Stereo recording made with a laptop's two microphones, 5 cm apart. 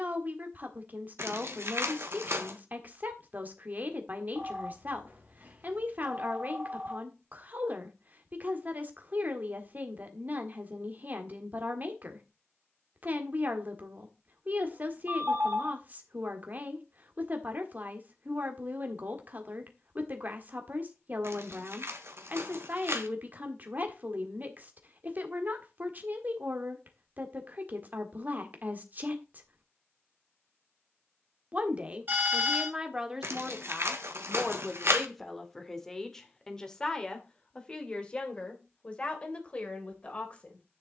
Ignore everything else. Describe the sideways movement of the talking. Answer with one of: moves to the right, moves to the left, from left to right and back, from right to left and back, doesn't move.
moves to the left.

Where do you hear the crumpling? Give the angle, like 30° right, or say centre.
60° right.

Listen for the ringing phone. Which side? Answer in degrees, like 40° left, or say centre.
40° right.